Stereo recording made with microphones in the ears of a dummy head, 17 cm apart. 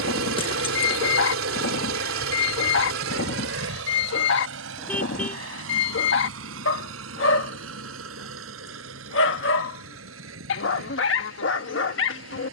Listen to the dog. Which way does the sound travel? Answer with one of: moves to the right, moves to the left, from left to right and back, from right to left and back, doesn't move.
doesn't move.